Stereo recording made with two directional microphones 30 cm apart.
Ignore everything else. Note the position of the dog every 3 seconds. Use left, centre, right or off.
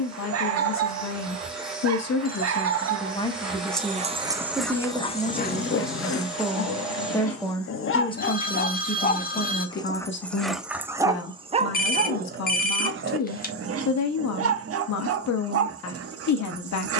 right, centre, left, centre, right, right.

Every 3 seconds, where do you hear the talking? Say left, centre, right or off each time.
left, centre, centre, left, left, left.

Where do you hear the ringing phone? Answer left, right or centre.
left.